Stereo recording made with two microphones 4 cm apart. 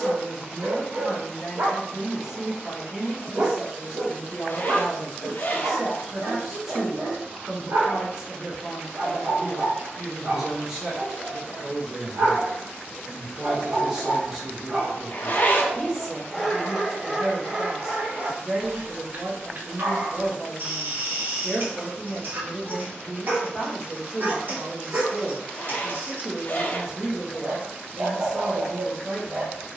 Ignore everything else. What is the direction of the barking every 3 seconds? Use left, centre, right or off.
right, right, right, right, right, centre, right, right, right, right.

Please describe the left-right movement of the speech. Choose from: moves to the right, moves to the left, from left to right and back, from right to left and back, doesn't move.
doesn't move.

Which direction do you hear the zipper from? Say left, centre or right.
left.